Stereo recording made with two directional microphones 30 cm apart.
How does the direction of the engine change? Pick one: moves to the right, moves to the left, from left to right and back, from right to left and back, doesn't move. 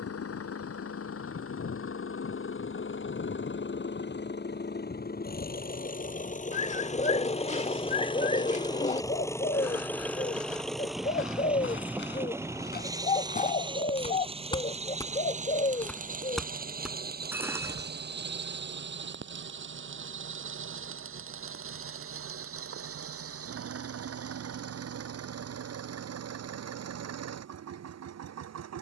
moves to the right.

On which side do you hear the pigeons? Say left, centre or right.
left.